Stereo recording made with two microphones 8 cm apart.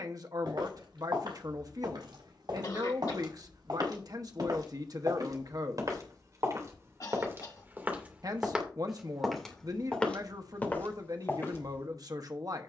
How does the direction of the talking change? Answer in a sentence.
In this clip you hear the talking stay in one place.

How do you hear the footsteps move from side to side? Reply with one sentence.
You can hear the footsteps go from the right side to the left.